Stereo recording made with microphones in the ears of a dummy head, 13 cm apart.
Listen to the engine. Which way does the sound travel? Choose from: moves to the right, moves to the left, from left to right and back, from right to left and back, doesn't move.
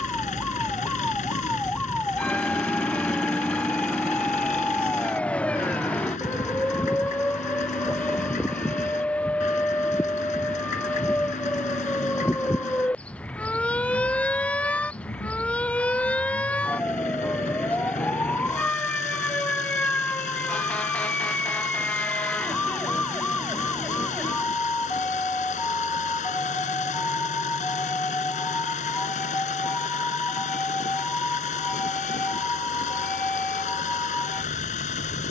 doesn't move.